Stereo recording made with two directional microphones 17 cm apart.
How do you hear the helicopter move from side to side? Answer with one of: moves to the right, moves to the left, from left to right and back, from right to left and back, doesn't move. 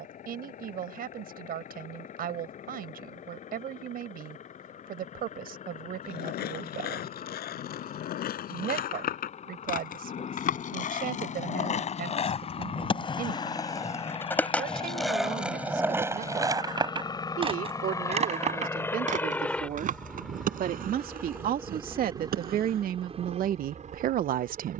moves to the right.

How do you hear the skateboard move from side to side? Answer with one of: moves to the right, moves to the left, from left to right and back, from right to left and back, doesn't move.
moves to the right.